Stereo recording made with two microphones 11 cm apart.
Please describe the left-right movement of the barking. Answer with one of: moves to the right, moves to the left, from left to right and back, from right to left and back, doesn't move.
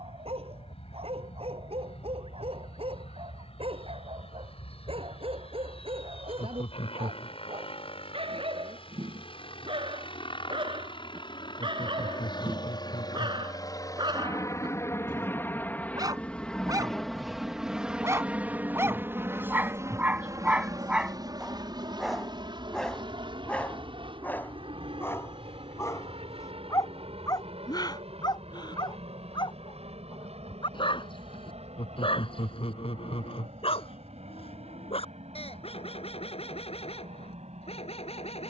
moves to the left.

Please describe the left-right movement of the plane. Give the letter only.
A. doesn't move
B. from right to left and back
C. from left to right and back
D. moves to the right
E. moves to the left
D.